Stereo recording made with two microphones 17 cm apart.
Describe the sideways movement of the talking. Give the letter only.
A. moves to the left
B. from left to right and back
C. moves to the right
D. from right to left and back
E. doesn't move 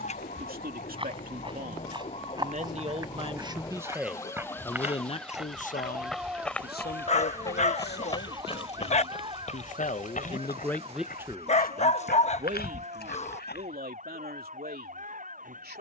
D.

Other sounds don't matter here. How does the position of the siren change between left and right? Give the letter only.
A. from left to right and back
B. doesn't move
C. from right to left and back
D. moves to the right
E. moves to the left
D.